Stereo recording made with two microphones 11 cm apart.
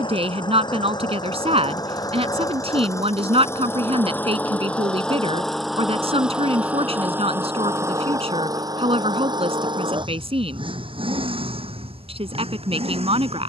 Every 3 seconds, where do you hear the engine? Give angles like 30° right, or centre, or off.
40° left, 10° left, 20° right, 50° right, 60° right.